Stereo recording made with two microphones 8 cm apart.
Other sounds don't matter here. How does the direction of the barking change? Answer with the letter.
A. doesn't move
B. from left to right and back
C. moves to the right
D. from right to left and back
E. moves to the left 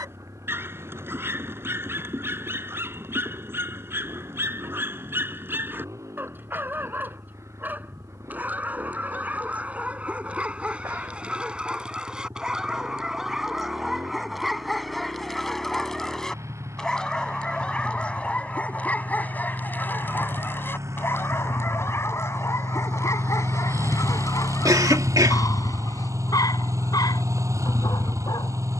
E.